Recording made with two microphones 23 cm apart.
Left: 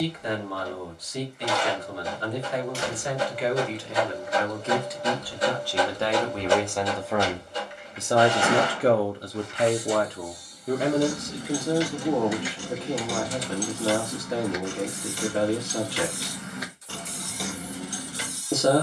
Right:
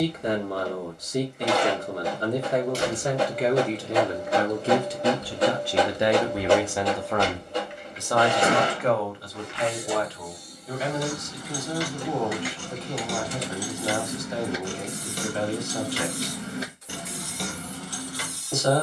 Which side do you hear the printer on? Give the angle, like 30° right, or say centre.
70° right.